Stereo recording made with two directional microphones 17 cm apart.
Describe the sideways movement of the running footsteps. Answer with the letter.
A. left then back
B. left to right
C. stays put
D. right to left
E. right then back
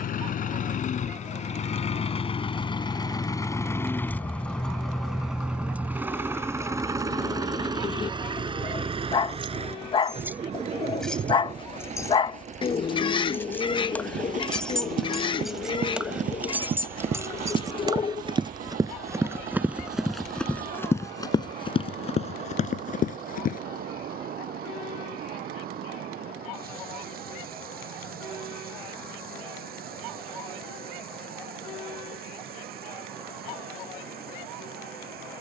D.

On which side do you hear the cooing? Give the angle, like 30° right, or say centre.
30° left.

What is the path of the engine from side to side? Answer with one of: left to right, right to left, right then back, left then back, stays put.
left to right.